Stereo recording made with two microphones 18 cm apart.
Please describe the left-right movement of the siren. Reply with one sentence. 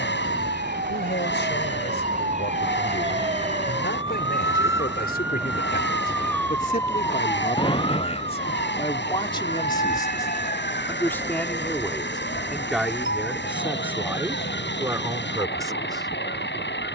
In this clip you hear the siren move from right to left.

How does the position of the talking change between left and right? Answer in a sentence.
In this clip you hear the talking go from the left side to the right.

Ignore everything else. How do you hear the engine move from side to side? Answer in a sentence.
In this clip you hear the engine stay in one place.